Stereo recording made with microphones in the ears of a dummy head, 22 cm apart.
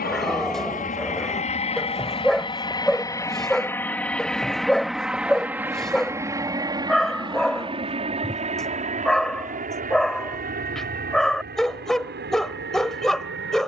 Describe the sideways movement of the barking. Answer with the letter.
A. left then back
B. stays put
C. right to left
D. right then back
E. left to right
B.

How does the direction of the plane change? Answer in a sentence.
In this clip you hear the plane move from left to right.